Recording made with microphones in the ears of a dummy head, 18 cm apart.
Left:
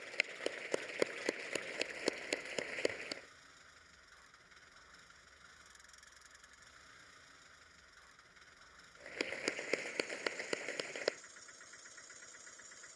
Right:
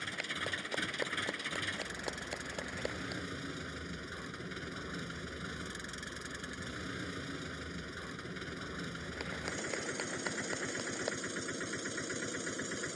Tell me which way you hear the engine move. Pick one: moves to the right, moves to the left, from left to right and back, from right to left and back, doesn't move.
doesn't move.